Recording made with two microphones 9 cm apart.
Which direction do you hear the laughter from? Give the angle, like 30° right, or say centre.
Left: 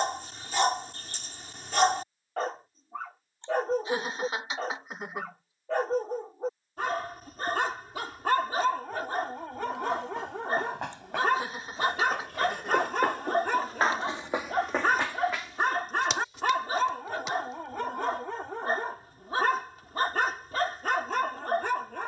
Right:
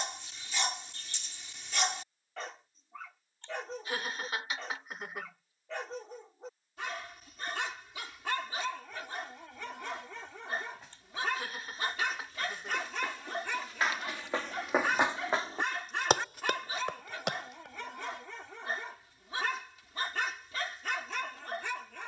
20° left.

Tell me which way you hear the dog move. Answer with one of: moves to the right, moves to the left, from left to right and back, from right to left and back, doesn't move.
doesn't move.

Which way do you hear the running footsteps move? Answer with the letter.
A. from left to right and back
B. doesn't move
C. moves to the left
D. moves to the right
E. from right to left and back
D.